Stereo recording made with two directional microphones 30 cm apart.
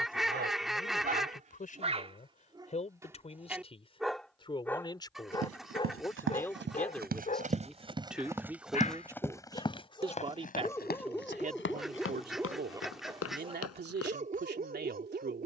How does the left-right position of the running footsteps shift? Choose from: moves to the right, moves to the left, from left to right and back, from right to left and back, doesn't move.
moves to the left.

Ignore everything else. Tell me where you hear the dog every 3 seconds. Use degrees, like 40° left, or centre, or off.
30° right, 10° left, 20° left, 10° left, 20° right.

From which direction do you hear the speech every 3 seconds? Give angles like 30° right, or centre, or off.
30° left, 20° left, centre, 20° right, 30° right.